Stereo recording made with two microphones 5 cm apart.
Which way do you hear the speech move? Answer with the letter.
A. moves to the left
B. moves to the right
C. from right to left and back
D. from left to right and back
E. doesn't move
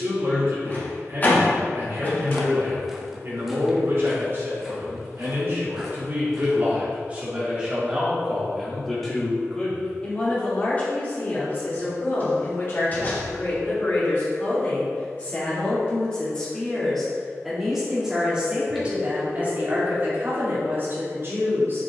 C.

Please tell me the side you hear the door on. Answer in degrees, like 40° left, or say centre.
30° left.